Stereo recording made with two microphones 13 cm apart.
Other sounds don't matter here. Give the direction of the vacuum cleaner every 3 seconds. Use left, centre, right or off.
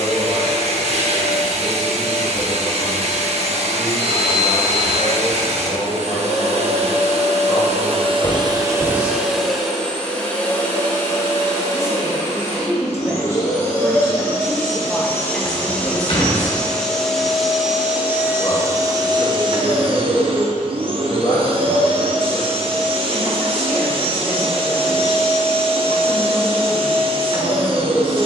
right, right, right, centre, left, centre, right, right, right, right.